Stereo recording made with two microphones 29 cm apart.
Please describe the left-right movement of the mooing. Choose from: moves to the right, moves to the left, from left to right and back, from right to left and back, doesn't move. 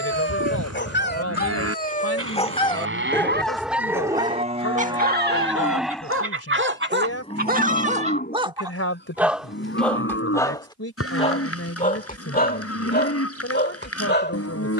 moves to the left.